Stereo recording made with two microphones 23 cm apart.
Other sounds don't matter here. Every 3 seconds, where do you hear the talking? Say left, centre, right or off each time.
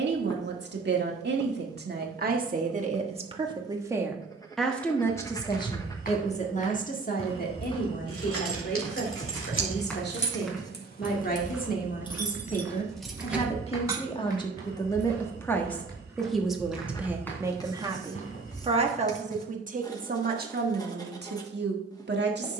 right, centre, left, left, left, centre, right, right.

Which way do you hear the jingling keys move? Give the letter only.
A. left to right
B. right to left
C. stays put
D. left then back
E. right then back
A.